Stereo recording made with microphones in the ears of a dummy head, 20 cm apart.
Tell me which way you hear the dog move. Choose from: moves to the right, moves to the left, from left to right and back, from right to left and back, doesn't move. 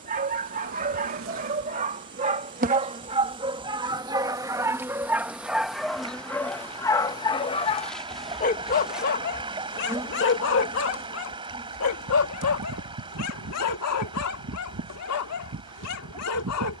moves to the left.